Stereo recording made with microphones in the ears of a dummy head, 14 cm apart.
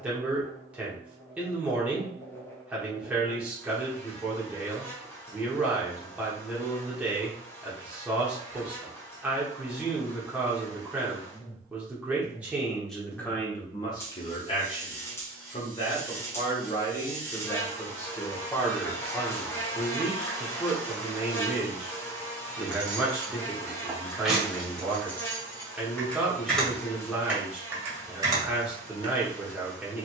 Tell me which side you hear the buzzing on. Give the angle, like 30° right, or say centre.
20° left.